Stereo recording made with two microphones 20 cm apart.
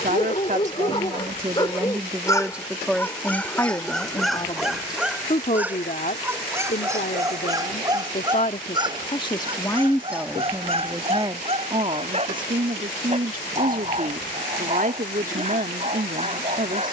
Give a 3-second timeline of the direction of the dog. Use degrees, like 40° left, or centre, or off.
20° left, centre, 20° right, 30° right, 30° right, 30° right.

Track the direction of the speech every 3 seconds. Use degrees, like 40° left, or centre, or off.
20° right, 20° left, 40° left, centre, 40° right, 40° right.